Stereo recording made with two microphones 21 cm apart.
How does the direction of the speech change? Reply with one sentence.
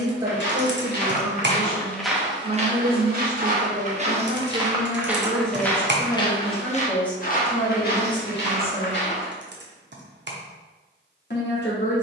You can hear the speech travel towards the left.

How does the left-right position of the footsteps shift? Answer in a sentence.
In this clip you hear the footsteps go right and come back.